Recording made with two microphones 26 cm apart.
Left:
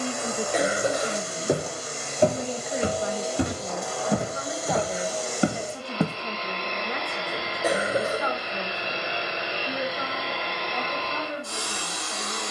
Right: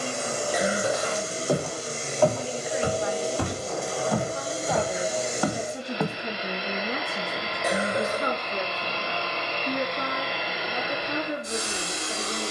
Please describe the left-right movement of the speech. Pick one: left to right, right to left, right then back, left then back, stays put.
left to right.